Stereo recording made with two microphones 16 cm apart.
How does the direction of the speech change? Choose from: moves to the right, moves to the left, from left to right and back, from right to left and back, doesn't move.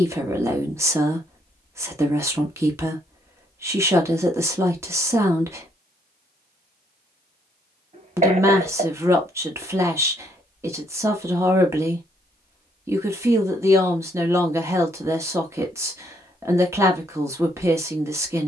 doesn't move.